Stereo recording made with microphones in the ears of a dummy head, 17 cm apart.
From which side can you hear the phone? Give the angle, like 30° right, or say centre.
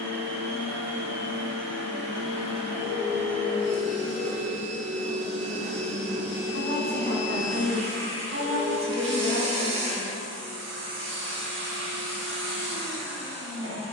centre.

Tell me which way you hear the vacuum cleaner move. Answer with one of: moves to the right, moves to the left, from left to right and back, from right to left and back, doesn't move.
doesn't move.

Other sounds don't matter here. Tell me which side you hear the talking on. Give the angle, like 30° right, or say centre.
60° right.